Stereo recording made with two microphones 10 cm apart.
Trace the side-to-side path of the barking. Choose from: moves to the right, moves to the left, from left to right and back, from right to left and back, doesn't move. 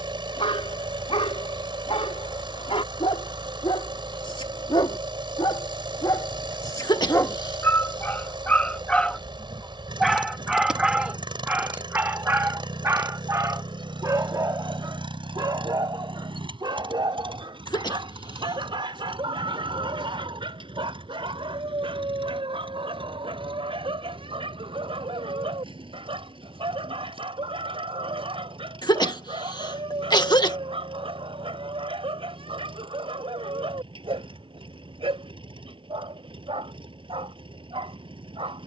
moves to the right.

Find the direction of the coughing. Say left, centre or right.
left.